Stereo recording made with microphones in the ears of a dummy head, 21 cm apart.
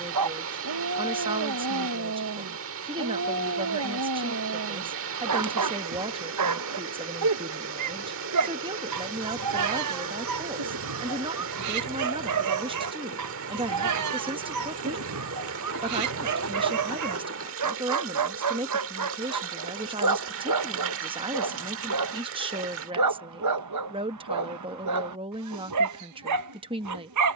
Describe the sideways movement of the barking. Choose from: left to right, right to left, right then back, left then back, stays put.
stays put.